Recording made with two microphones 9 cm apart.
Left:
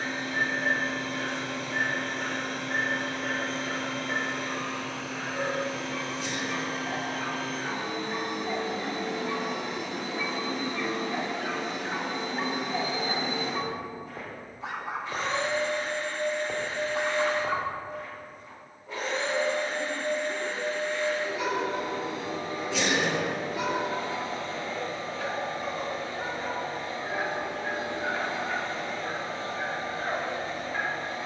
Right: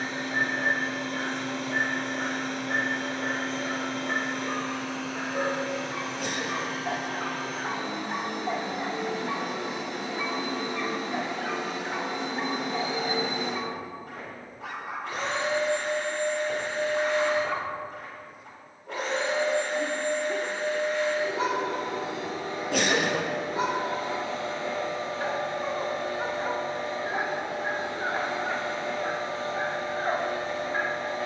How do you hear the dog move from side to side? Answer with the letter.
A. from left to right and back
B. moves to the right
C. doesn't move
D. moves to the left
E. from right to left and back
E.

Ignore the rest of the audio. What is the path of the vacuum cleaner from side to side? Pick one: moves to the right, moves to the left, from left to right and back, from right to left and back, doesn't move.
doesn't move.